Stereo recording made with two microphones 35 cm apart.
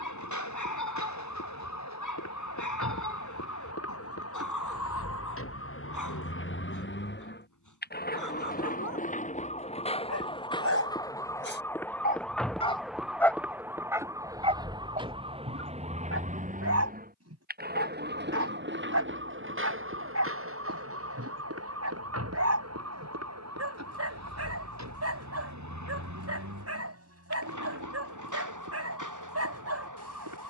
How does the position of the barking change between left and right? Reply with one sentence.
In this clip you hear the barking move to the right.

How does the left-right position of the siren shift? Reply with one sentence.
You can hear the siren go from the left side to the right.